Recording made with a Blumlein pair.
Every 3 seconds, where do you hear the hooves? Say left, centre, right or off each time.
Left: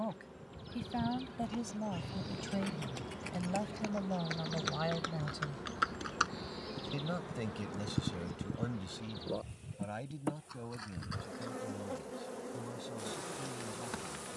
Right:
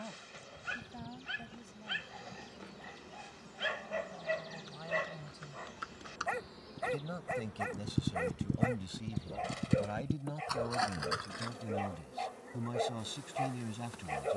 left, left, centre, right, off.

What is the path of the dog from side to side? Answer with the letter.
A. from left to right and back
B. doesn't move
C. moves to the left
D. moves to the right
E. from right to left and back
B.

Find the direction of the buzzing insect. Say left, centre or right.
left.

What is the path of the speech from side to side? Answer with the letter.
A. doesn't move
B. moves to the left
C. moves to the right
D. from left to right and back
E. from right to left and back
C.